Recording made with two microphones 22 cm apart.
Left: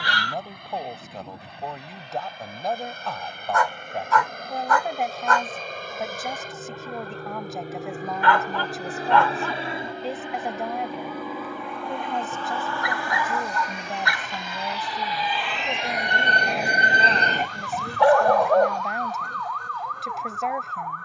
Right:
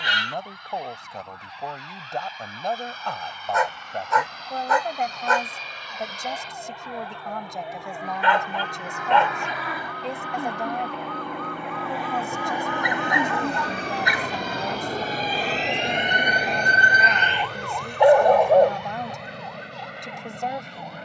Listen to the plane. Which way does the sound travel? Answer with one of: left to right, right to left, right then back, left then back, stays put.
left to right.